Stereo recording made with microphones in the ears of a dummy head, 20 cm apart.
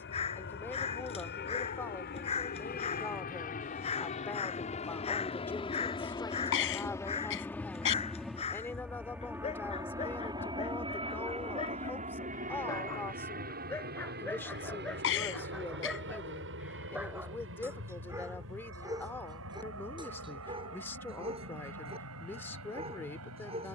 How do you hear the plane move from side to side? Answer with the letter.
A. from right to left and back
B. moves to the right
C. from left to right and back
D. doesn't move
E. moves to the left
B.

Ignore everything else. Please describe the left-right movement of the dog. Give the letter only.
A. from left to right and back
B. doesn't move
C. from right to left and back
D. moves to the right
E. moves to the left
D.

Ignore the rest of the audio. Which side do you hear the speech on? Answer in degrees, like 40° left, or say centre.
10° left.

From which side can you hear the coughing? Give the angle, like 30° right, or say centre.
60° left.